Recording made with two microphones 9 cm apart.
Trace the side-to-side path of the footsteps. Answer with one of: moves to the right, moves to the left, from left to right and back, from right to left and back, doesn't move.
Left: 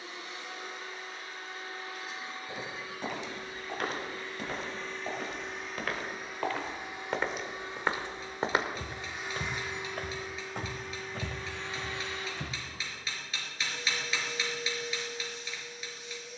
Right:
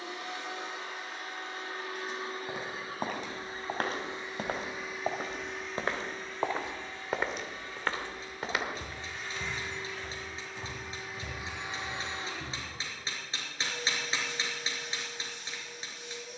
moves to the left.